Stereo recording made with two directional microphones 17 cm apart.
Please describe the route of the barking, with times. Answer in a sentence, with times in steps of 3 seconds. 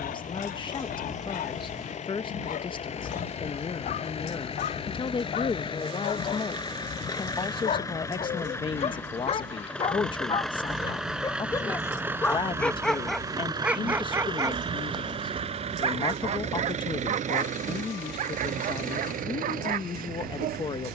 You can hear the barking on the left from 0 s, in the centre from 12 s and on the right from 15 s.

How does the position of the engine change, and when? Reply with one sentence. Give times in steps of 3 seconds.
You can hear the engine on the left from 0 s, in the centre from 9 s and on the right from 12 s.